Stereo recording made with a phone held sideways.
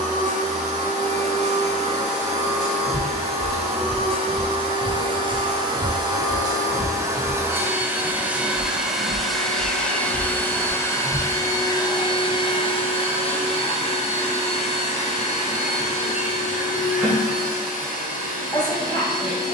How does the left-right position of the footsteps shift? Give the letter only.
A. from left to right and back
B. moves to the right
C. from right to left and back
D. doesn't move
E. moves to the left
E.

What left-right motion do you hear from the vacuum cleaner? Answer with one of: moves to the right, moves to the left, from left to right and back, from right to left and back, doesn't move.
moves to the left.